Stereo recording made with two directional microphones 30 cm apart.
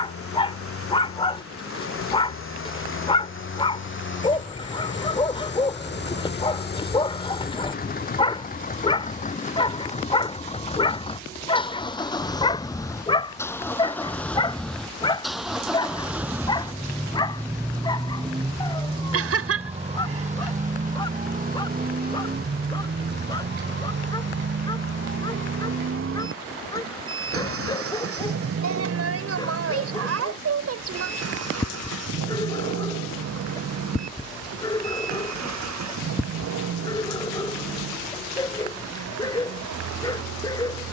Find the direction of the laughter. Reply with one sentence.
You can hear the laughter on the right.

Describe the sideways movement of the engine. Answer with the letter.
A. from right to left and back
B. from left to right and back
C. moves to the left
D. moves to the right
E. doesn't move
D.